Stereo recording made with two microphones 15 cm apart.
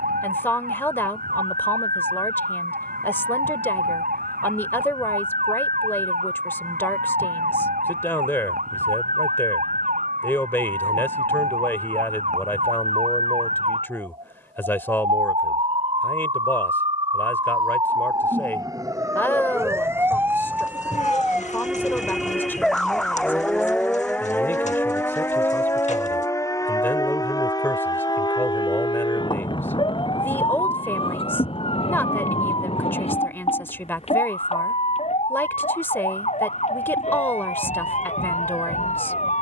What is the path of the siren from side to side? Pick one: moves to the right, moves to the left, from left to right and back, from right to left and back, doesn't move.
moves to the left.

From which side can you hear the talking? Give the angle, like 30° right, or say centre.
10° left.